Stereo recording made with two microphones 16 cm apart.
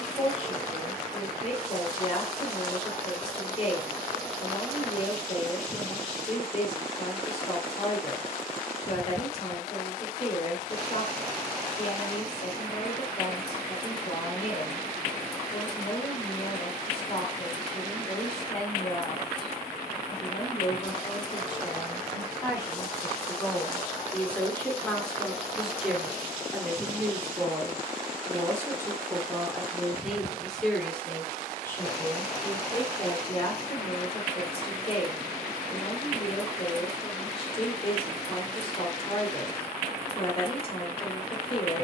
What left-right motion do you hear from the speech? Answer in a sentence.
You can hear the speech go right and come back.